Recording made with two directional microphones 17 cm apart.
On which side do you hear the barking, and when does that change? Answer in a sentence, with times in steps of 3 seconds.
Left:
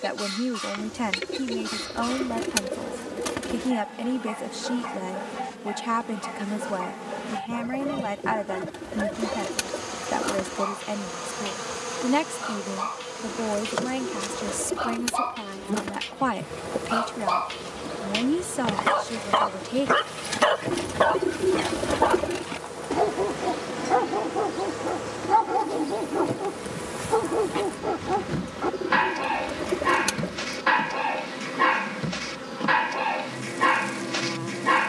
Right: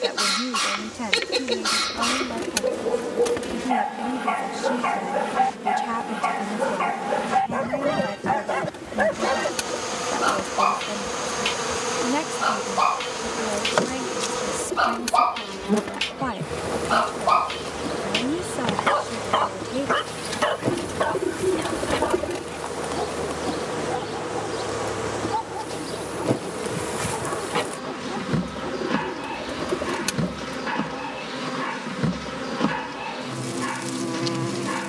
You can hear the barking on the right from 0 s, in the centre from 18 s and on the left from 21 s.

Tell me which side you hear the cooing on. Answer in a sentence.
You can hear the cooing in the centre.